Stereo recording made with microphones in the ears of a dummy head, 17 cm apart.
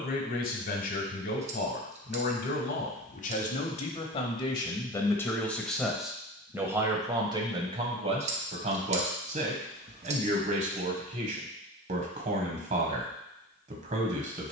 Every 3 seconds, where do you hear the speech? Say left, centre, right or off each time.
left, left, right, right, right.